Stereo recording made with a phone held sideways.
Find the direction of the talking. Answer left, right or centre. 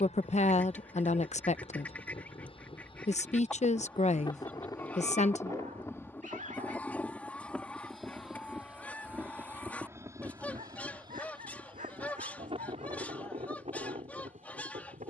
left.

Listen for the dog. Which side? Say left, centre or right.
right.